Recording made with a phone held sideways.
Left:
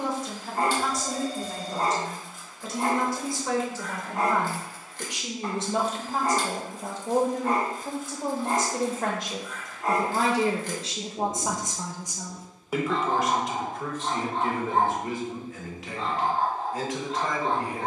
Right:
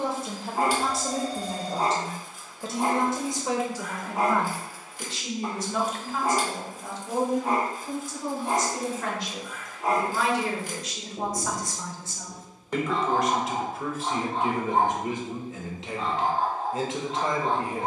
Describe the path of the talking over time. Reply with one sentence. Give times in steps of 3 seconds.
In this clip you hear the talking on the right from 0 s, in the centre from 3 s, on the left from 6 s, in the centre from 12 s and on the right from 15 s.